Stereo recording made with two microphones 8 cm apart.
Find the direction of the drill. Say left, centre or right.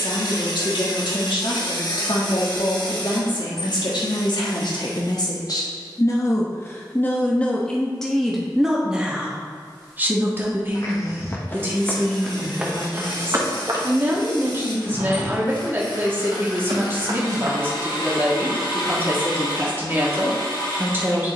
left.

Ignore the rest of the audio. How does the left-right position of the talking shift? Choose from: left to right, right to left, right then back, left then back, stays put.
left to right.